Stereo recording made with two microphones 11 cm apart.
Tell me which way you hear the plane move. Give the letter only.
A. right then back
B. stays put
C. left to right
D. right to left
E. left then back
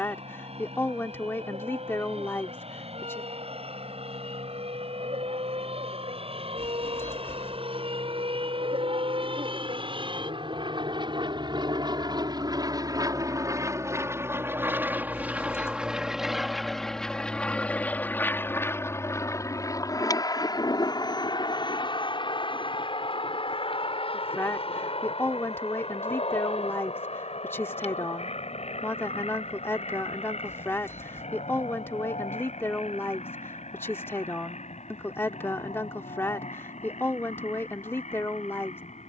D.